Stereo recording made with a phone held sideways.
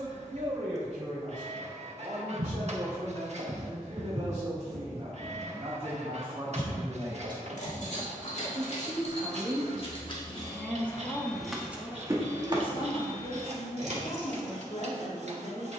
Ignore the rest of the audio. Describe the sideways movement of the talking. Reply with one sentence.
You can hear the talking move from right to left.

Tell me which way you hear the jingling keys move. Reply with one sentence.
In this clip you hear the jingling keys move to the right.